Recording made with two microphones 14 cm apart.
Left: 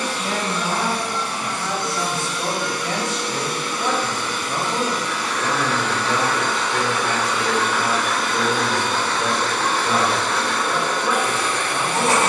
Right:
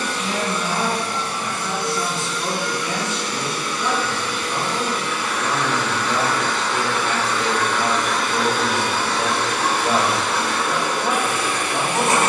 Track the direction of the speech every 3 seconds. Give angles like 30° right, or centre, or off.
60° left, 30° left, 10° right, 20° right.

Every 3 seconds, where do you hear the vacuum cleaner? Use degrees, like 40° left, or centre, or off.
60° left, 40° left, 10° left, 10° right.